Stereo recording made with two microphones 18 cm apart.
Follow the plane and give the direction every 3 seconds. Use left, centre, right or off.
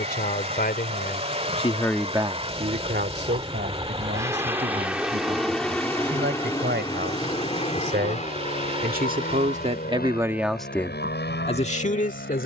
right, centre, left, left.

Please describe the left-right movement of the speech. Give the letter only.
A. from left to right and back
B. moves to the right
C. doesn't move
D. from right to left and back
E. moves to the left
A.